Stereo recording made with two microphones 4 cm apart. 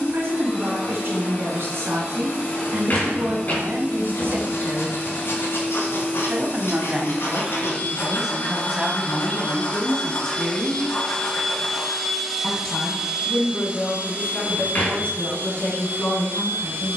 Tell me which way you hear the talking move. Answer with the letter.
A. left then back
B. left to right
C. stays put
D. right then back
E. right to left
E.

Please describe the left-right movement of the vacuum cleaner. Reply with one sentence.
In this clip you hear the vacuum cleaner move from left to right.